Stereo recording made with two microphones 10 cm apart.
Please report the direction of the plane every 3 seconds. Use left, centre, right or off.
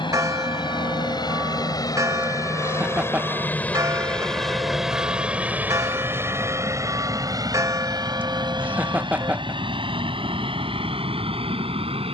left, centre, right, right.